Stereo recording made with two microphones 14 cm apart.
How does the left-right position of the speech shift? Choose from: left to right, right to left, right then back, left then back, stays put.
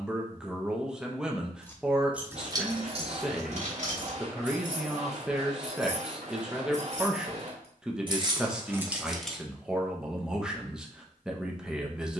stays put.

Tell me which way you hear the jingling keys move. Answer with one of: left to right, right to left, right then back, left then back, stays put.
right then back.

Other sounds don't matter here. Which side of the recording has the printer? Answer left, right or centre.
right.